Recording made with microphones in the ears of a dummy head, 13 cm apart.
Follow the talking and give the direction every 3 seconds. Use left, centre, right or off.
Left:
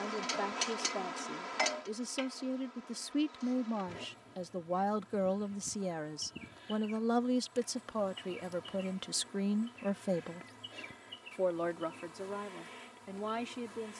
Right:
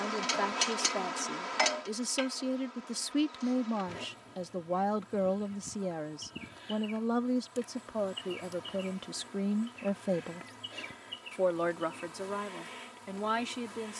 right, centre, left, centre, right.